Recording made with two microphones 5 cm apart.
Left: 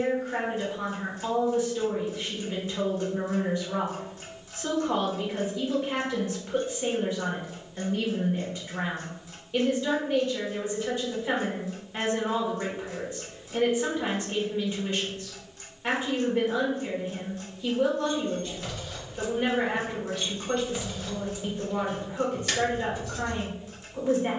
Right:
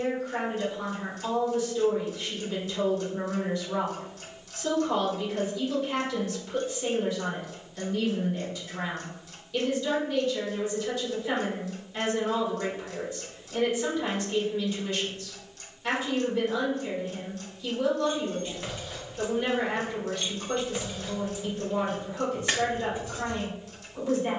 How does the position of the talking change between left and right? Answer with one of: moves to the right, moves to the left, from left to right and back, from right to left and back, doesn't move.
doesn't move.